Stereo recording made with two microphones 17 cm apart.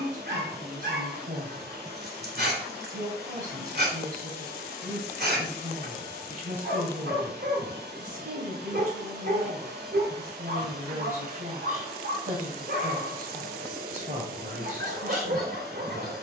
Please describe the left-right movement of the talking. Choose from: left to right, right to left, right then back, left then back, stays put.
stays put.